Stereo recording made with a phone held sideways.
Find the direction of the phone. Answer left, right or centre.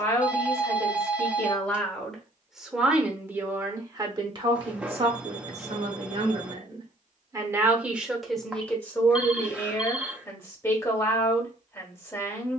centre.